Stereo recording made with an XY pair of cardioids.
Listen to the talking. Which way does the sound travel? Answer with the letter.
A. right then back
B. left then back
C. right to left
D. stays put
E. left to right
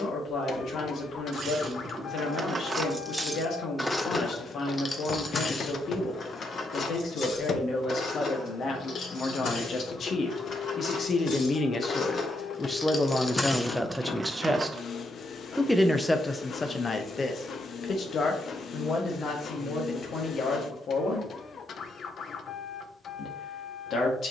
A.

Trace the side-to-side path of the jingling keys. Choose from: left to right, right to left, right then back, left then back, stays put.
left then back.